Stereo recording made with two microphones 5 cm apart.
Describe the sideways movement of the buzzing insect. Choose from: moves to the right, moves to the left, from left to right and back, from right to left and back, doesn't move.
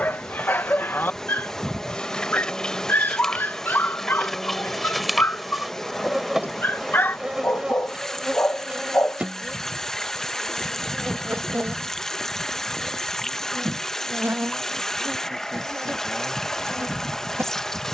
moves to the right.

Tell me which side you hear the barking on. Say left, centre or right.
left.